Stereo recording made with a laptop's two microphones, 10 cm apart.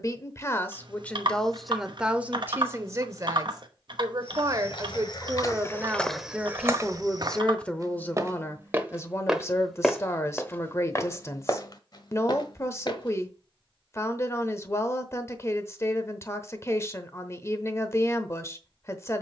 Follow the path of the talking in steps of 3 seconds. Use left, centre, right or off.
centre, right, centre, left, left, left, left.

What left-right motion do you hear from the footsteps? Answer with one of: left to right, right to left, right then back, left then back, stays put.
right then back.